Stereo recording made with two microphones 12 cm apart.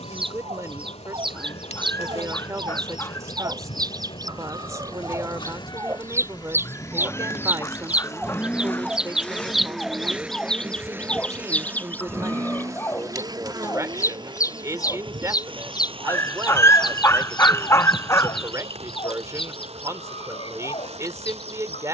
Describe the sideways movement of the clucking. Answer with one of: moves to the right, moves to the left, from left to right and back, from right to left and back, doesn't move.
moves to the left.